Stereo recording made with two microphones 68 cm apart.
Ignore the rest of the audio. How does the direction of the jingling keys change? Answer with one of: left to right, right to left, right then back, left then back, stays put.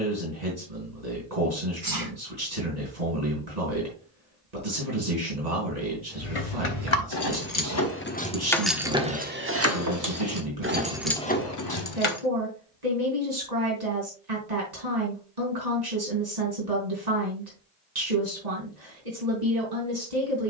right then back.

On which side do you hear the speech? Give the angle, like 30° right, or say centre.
80° right.